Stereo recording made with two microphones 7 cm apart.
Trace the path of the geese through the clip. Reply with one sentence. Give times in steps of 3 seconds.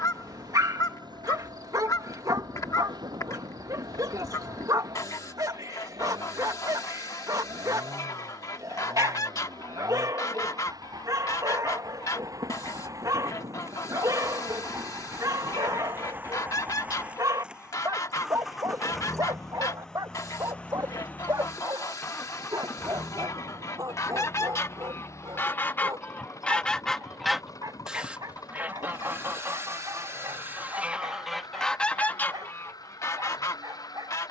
In this clip you hear the geese on the left from 0 s, on the right from 27 s, in the centre from 30 s and on the left from 33 s.